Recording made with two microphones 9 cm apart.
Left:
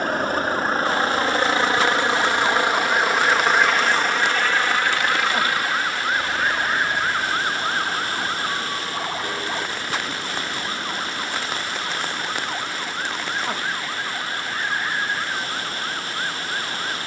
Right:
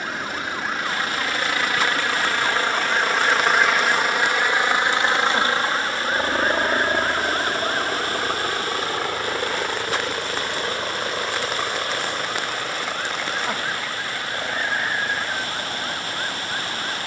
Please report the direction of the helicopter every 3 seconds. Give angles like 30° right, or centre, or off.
30° left, 10° right, 40° right, 60° right, 60° right, 70° right.